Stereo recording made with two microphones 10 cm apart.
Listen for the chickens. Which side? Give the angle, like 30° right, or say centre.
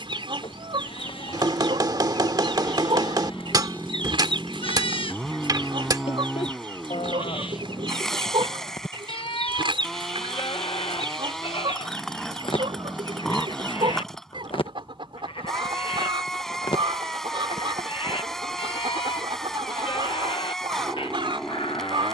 60° right.